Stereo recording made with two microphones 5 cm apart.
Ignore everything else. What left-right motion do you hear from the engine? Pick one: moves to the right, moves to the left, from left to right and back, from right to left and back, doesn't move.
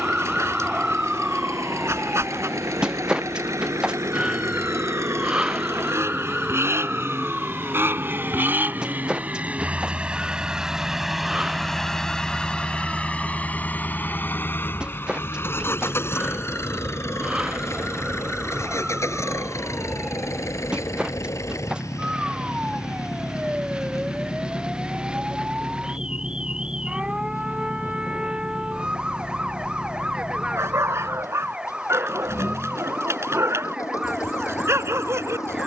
moves to the left.